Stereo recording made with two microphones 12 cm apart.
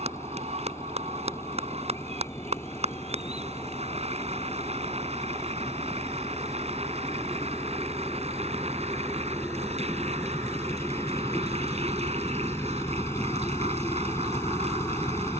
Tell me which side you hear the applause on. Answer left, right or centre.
right.